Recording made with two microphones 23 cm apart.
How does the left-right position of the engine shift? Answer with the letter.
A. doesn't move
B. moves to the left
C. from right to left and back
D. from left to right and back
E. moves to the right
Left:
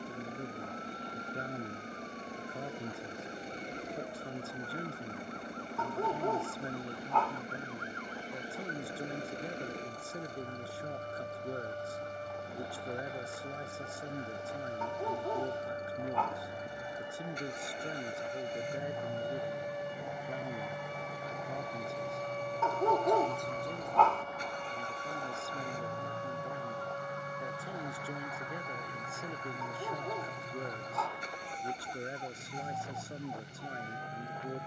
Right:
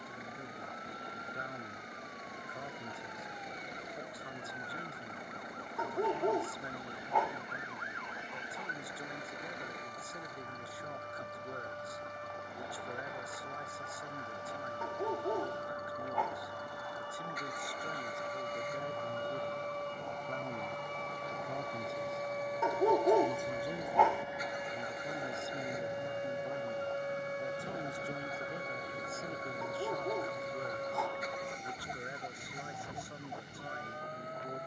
A.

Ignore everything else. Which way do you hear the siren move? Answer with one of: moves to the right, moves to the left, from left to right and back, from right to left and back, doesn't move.
moves to the right.